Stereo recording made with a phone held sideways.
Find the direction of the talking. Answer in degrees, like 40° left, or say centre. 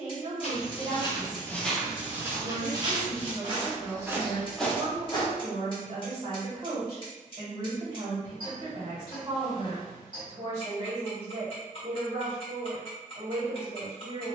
40° right.